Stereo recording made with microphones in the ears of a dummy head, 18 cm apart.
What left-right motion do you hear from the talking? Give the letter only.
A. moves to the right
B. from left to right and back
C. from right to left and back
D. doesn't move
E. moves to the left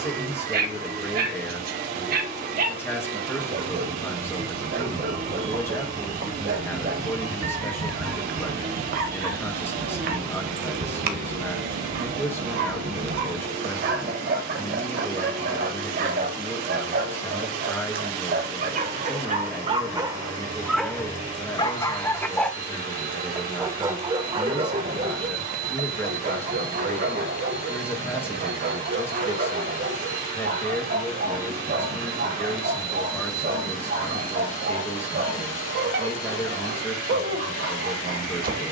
D.